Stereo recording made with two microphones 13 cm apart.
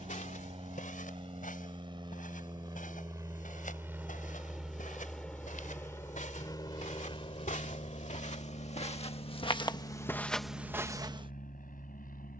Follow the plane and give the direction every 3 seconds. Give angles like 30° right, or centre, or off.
40° right, 10° right, 40° left, 60° left.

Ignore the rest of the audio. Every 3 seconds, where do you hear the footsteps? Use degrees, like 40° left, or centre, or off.
80° left, 80° left, 70° left, 10° left.